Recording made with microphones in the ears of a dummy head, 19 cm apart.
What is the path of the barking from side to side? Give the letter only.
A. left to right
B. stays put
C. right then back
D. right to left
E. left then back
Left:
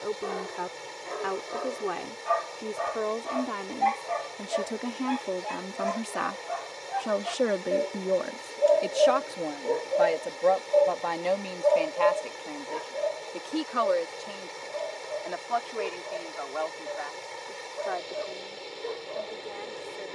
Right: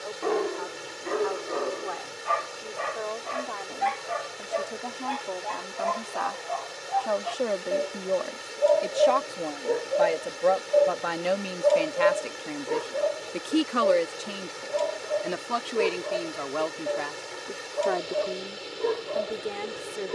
E.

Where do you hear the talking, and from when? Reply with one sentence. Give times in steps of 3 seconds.
In this clip you hear the talking on the left from 0 s, in the centre from 9 s and on the right from 12 s.